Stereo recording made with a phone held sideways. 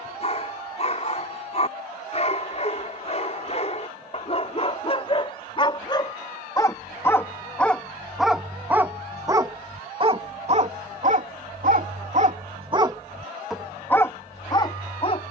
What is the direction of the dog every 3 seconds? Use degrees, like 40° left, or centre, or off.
40° left, 40° left, 10° left, 40° right, centre.